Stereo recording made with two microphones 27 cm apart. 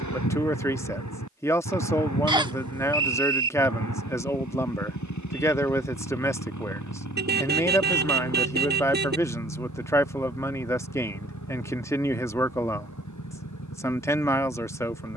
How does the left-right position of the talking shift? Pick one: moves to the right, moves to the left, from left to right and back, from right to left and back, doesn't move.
doesn't move.